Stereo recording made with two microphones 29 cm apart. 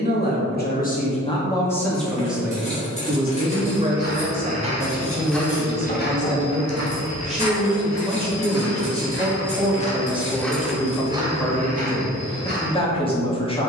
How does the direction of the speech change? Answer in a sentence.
In this clip you hear the speech go right and come back.